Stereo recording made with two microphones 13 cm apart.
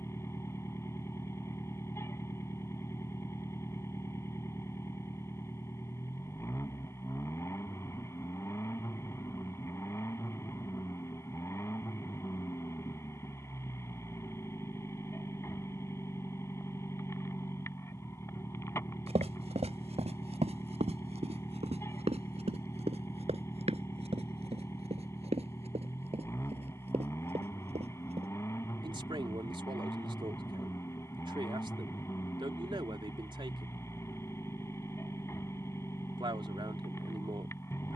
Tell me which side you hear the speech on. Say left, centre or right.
right.